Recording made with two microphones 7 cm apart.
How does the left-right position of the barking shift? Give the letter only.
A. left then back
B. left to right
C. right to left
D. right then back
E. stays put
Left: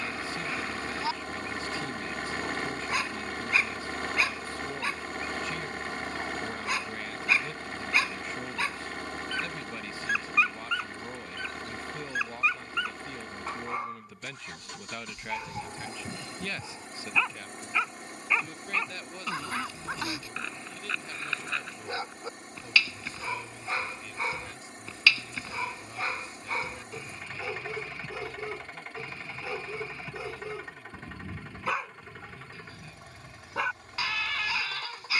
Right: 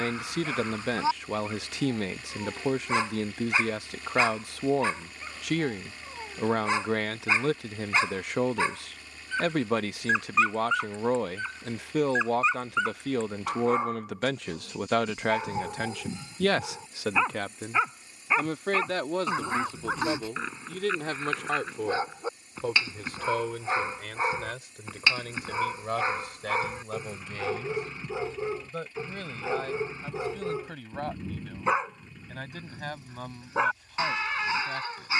E.